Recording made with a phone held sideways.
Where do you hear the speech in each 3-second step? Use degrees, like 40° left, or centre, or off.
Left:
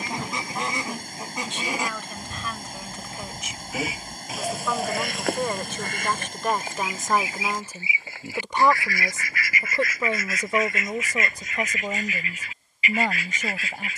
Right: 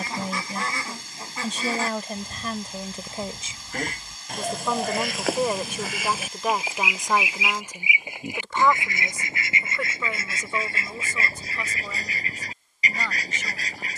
40° right, 20° right, 10° left, 40° left, 50° left.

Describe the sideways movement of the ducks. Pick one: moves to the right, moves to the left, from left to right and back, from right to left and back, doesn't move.
moves to the right.